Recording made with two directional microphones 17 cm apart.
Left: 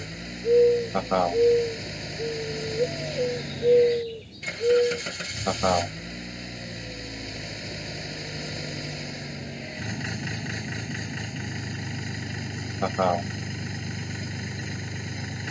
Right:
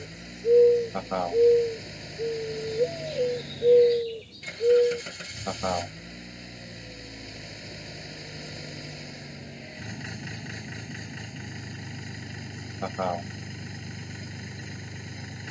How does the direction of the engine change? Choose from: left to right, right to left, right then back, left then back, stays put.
stays put.